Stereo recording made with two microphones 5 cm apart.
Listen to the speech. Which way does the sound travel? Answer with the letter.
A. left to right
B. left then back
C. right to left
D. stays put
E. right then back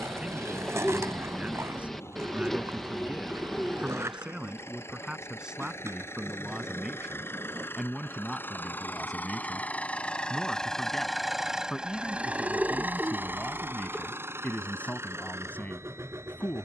C.